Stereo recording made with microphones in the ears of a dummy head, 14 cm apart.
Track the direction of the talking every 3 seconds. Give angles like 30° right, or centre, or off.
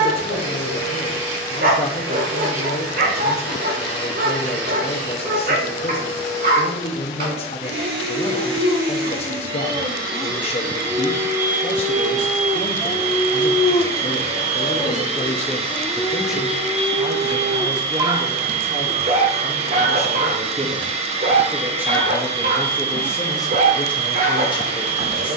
40° left, 40° left, 40° left, 40° left, 30° left, centre, 40° right, centre, 30° left.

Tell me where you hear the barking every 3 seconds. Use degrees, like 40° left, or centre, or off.
60° right, 60° right, 60° right, 30° right, 30° left, centre, 40° right, 50° right, 50° right.